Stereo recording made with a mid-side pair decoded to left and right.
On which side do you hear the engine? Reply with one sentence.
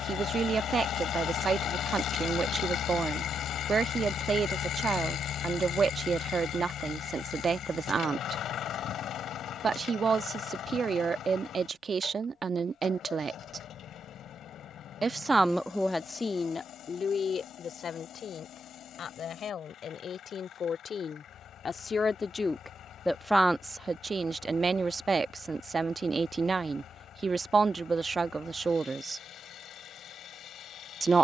You can hear the engine on the left.